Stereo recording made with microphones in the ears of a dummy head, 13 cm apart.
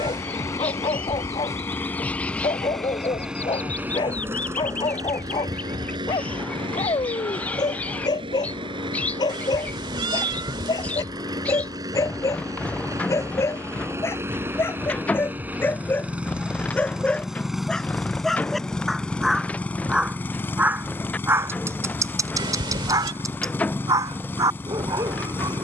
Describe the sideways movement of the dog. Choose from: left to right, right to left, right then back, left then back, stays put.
left to right.